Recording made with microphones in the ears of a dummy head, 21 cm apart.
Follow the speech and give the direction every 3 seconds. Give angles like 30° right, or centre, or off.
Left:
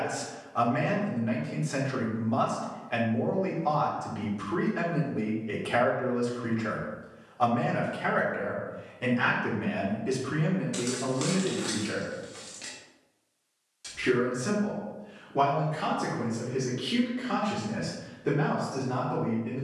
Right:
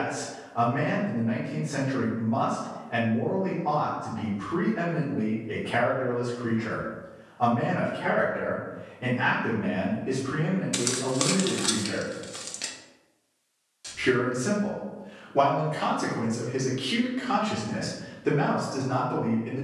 60° left, 60° left, 60° left, 40° left, centre, 10° right, 20° right.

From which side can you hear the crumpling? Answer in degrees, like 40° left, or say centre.
30° right.